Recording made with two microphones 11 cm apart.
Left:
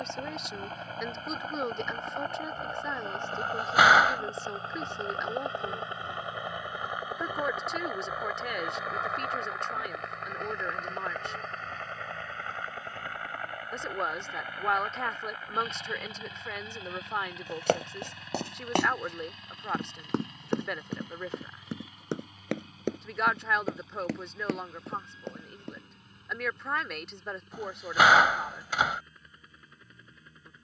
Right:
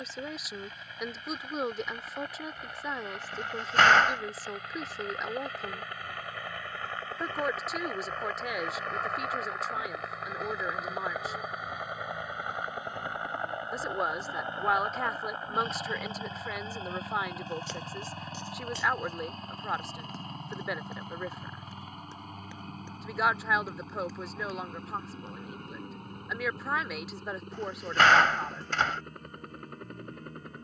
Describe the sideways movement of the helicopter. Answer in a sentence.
In this clip you hear the helicopter move to the right.